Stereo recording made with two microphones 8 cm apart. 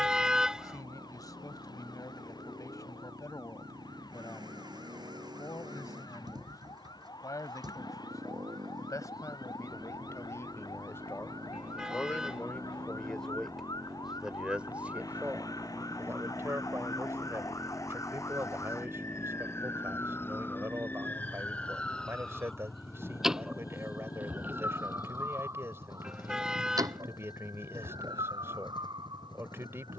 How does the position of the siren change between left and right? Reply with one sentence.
In this clip you hear the siren go from the left side to the right.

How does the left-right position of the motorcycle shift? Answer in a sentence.
In this clip you hear the motorcycle move from right to left.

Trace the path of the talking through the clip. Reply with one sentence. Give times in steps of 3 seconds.
In this clip you hear the talking on the left from 0 s, in the centre from 12 s and on the right from 15 s.